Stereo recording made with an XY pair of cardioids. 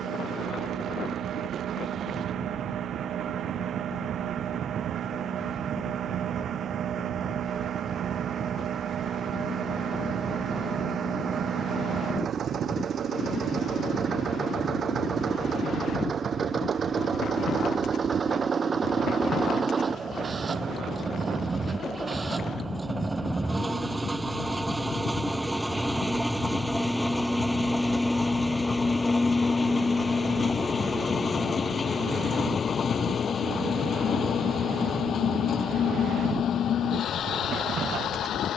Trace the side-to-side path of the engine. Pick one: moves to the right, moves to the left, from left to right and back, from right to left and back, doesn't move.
moves to the left.